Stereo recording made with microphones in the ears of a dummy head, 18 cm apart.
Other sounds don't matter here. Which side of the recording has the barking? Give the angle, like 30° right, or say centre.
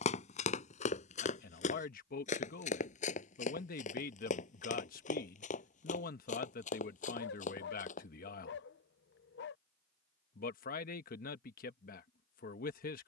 60° left.